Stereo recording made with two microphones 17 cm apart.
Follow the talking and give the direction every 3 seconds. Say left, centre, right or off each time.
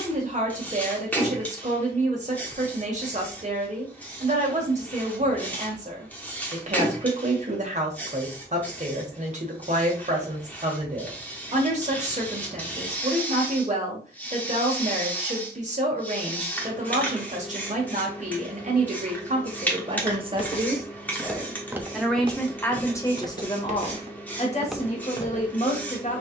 right, right, right, right, right, right, right, centre, left.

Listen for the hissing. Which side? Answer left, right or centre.
centre.